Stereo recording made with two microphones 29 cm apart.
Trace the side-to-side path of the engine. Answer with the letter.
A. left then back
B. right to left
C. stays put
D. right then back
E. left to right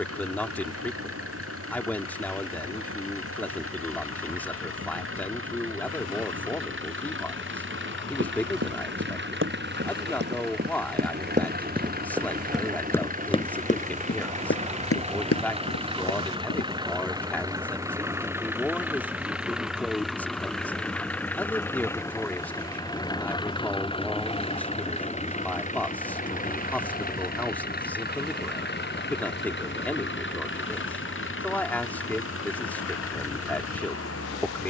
B.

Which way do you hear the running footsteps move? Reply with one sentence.
You can hear the running footsteps go from the right side to the left.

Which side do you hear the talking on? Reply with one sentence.
You can hear the talking in the centre.